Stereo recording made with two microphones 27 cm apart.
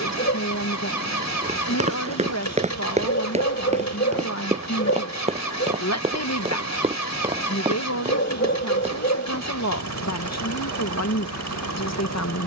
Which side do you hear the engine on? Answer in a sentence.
In this clip you hear the engine on the left.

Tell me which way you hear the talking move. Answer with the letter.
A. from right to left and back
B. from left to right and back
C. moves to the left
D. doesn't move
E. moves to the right
D.